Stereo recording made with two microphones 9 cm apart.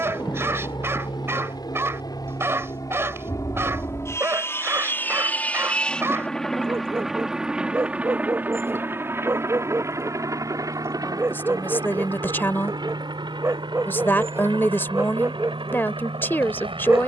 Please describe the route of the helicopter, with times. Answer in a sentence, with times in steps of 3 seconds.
In this clip you hear the helicopter on the left from 0 s, in the centre from 6 s and on the right from 9 s.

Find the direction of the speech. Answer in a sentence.
In this clip you hear the speech on the left.